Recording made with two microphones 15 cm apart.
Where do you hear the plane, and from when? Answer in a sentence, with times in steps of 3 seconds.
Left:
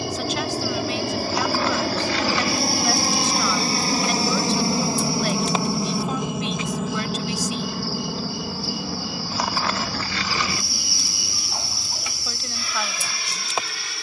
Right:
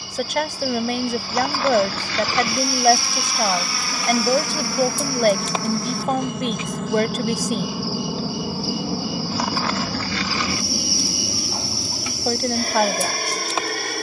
You can hear the plane on the left from 0 s, in the centre from 6 s and on the right from 9 s.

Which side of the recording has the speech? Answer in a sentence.
You can hear the speech on the right.